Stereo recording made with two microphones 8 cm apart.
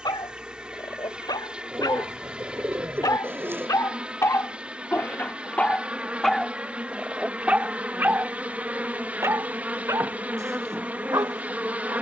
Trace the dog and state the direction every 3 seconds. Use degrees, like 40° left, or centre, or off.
70° left, 40° left, 10° right, 40° right.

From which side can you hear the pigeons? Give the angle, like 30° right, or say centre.
30° right.